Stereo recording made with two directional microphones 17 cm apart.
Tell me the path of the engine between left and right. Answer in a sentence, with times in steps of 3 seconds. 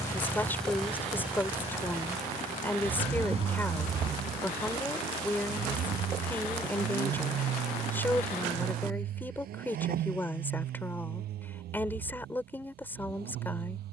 You can hear the engine in the centre from 0 s and on the right from 3 s.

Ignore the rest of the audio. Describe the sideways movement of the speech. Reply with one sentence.
In this clip you hear the speech stay in one place.